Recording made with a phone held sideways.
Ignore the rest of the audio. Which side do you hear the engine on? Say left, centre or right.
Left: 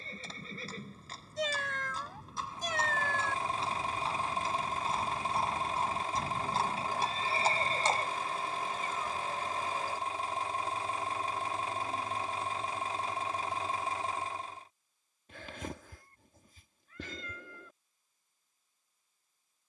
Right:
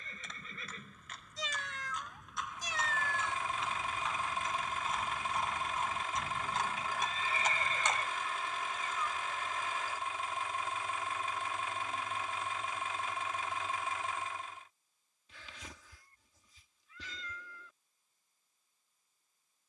left.